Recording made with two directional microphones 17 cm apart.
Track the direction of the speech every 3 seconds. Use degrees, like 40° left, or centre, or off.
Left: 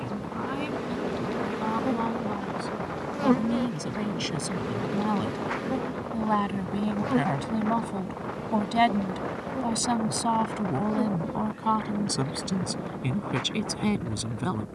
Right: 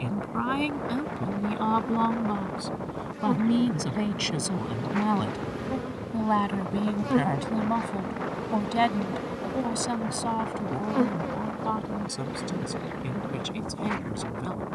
40° right, 20° right, centre, 20° left, 40° left.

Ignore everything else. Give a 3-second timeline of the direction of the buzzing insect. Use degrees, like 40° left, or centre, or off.
60° left, 20° left, 10° right, 30° right, 30° right.